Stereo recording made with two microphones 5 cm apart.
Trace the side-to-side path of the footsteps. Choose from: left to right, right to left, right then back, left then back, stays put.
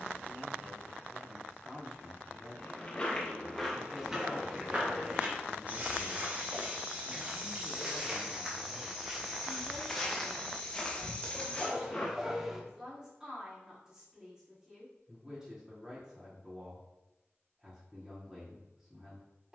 right then back.